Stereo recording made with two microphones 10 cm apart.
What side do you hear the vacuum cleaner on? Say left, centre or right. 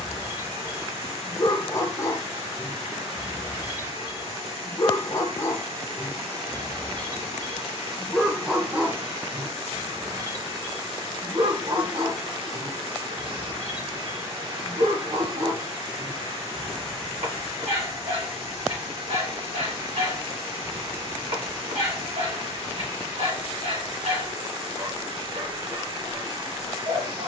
right.